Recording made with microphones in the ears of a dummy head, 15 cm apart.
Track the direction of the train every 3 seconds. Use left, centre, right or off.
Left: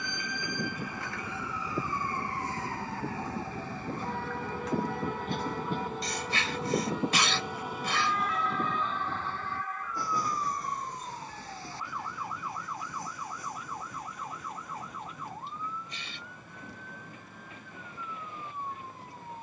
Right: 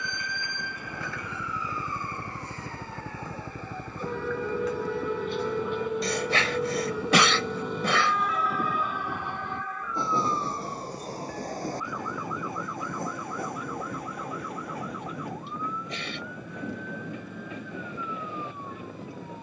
left, left, centre, right, right, right, right.